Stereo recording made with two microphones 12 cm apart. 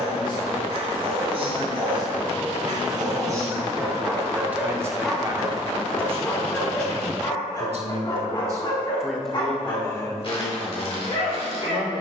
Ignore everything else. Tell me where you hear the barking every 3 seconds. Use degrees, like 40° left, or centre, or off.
40° right, 10° right, 30° left, 50° left.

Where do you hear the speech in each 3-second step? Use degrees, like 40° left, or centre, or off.
30° left, 10° right, 50° right, 30° left.